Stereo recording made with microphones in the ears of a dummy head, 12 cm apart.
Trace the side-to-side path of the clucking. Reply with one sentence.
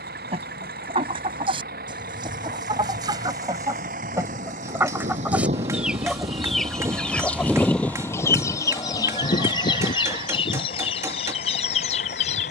In this clip you hear the clucking go from the right side to the left.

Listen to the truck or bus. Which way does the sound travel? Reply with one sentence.
In this clip you hear the truck or bus travel towards the left.